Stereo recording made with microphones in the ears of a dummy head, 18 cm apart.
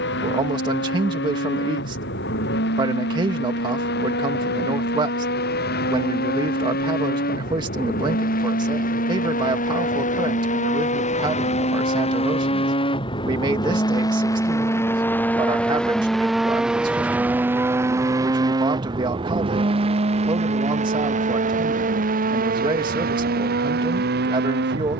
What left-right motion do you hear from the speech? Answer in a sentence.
You can hear the speech stay put.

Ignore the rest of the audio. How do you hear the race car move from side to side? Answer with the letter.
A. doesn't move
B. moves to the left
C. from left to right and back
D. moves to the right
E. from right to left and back
D.